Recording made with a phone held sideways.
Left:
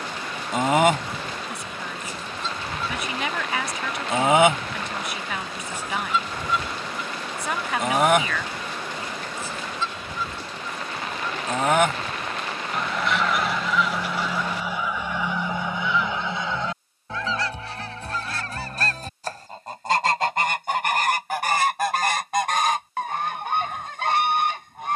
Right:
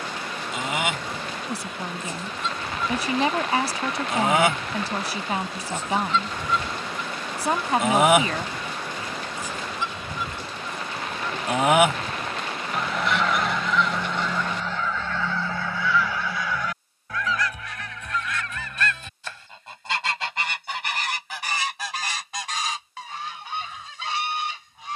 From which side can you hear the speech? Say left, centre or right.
right.